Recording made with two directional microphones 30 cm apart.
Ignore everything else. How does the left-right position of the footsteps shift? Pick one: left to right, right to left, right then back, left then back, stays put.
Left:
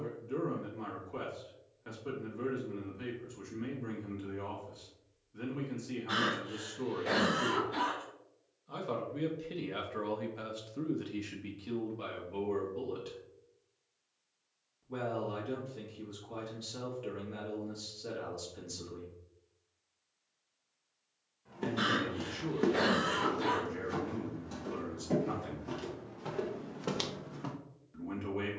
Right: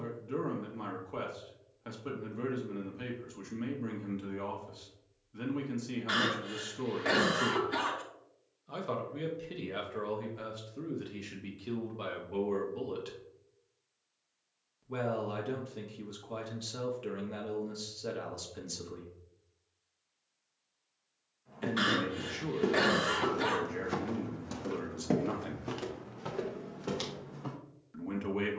right then back.